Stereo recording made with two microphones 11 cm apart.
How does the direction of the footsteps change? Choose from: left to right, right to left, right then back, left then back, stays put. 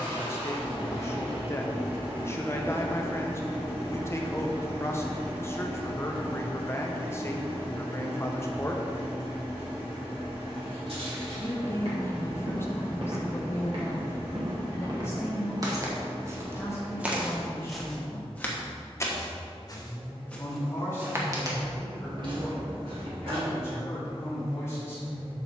left then back.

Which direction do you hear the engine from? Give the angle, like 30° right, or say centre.
20° right.